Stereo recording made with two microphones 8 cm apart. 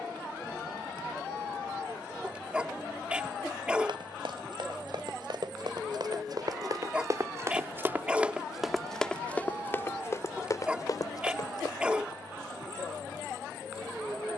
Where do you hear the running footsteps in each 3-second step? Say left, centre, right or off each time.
off, right, right, left, off.